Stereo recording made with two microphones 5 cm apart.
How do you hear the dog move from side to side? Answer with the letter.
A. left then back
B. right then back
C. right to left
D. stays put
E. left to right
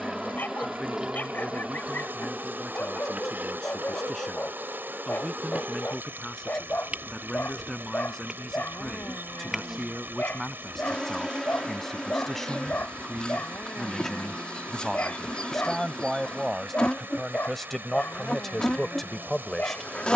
D.